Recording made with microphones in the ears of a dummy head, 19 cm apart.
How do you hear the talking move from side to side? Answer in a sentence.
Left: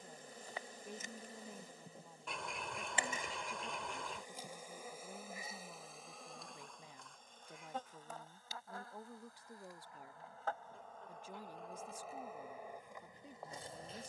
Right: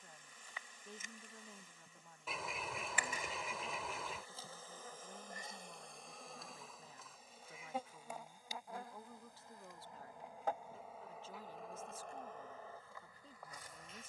You can hear the talking stay in one place.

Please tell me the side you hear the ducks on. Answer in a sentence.
You can hear the ducks in the centre.